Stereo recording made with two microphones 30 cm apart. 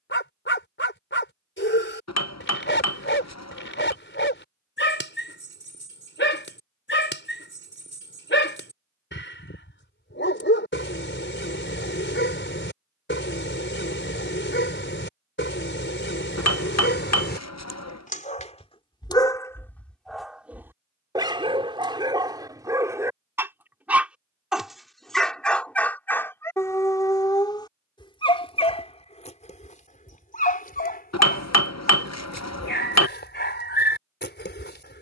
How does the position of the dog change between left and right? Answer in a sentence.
In this clip you hear the dog go right and come back.